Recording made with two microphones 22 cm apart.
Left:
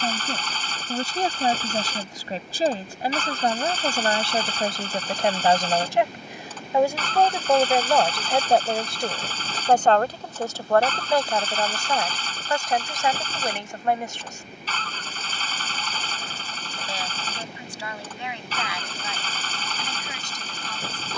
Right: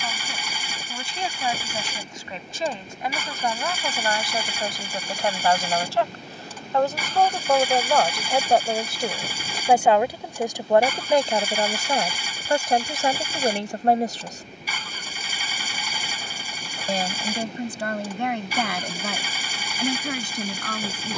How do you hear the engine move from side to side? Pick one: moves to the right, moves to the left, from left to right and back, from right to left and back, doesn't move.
doesn't move.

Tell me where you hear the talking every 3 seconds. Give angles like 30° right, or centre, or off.
40° left, 30° left, 10° left, 20° right, 30° right, 50° right, 60° right.